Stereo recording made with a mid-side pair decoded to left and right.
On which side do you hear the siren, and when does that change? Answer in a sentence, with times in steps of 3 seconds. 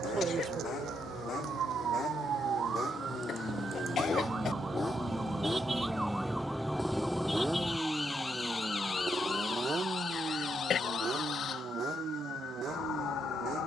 You can hear the siren on the right from 0 s, in the centre from 6 s and on the left from 9 s.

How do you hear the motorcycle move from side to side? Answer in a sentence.
In this clip you hear the motorcycle travel towards the right.